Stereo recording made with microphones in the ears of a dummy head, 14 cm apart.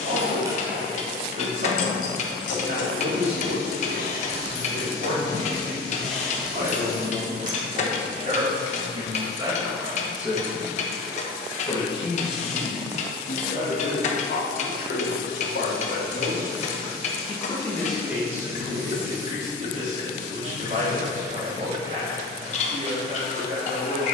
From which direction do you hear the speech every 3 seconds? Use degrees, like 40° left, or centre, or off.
50° right, 50° right, 40° right, centre, 60° left, 50° left, 40° right, 40° right.